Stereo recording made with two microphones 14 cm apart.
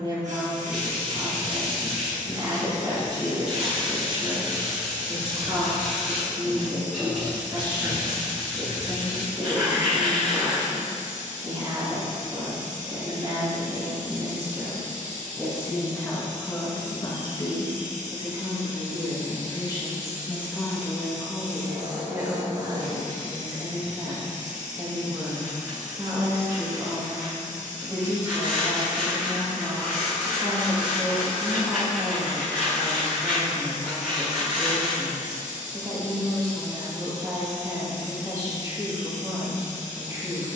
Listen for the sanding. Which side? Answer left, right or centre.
centre.